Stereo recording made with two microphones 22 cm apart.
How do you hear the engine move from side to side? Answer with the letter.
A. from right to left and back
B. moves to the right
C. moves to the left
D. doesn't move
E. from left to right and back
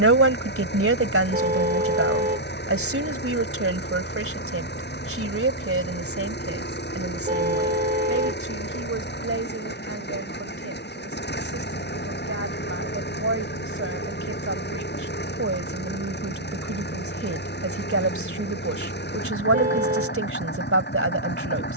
D.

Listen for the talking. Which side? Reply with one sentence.
In this clip you hear the talking on the right.